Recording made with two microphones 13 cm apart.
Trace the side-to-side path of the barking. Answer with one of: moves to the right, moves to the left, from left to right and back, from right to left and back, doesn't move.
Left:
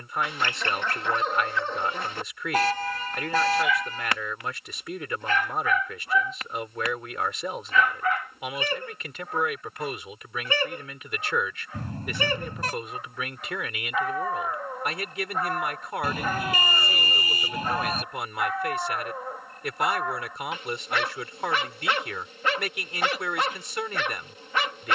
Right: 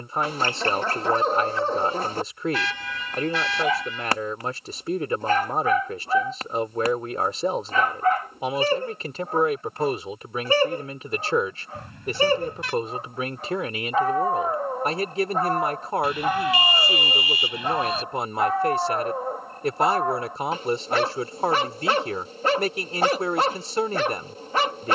doesn't move.